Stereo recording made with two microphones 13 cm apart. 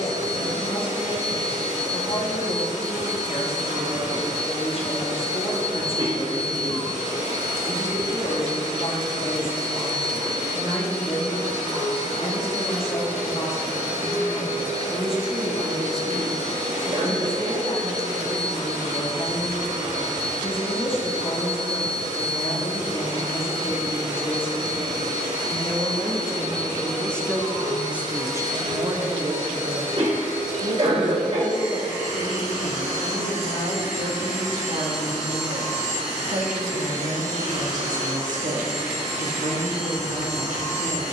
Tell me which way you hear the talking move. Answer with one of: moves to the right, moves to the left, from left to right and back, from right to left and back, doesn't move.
moves to the right.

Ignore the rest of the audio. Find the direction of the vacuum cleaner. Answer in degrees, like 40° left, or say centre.
70° right.